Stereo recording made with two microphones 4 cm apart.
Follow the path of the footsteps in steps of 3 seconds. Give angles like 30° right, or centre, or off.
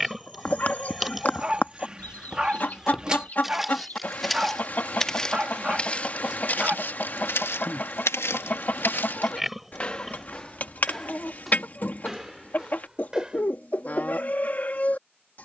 10° right, 10° left, 60° left, 10° left, 10° right.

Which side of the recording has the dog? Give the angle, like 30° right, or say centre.
20° right.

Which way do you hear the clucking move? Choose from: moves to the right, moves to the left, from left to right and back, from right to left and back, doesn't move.
doesn't move.